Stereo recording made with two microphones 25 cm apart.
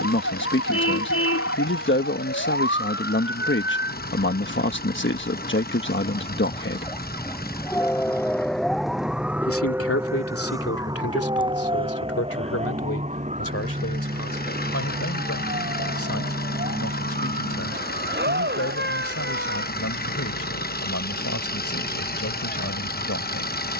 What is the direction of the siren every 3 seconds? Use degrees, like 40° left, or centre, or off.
60° left, 40° left, 10° left, 10° right, 30° right, 40° right, 40° right, 50° right.